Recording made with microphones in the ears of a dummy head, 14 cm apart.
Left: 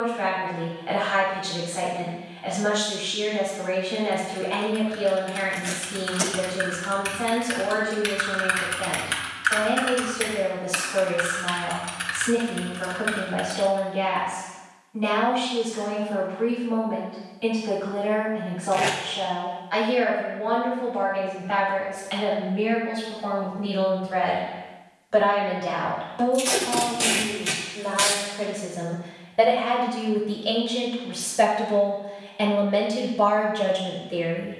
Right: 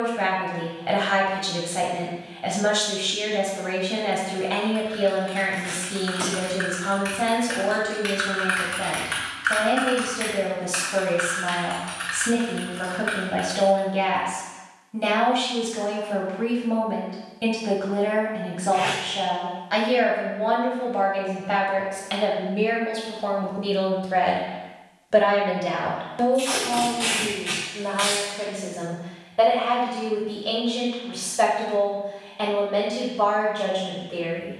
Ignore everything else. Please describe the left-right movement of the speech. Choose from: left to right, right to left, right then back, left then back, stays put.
right to left.